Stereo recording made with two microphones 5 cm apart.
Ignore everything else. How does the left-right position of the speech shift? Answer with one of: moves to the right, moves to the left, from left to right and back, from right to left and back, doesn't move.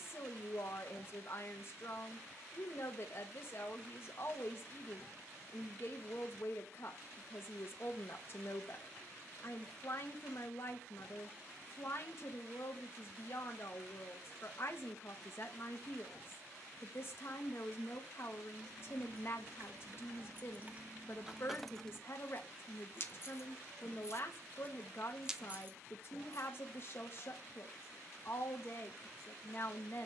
doesn't move.